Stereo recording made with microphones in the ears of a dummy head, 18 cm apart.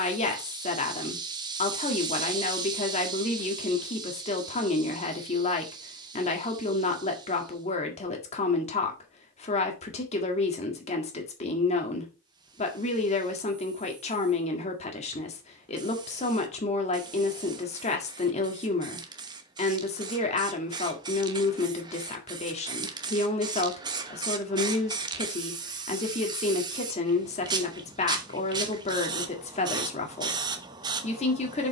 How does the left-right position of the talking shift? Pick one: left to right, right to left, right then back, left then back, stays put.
stays put.